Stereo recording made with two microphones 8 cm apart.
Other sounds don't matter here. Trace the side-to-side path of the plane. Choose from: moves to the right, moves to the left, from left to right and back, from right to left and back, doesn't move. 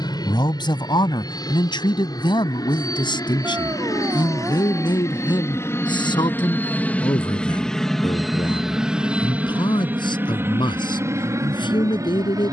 moves to the right.